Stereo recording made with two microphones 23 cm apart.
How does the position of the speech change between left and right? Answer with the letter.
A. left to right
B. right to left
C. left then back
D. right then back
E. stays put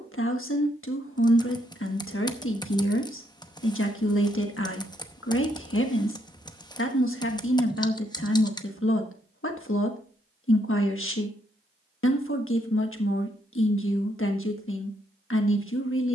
E.